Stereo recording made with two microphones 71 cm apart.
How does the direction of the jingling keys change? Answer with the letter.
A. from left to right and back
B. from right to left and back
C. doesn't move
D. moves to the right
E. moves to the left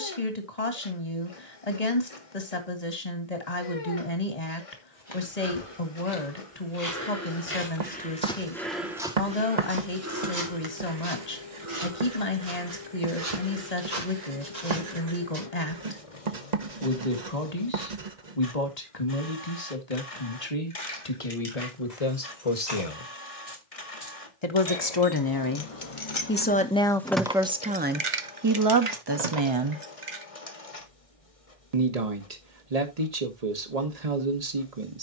D.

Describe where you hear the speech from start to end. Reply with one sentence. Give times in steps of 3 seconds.
You can hear the speech on the left from 0 s and on the right from 27 s.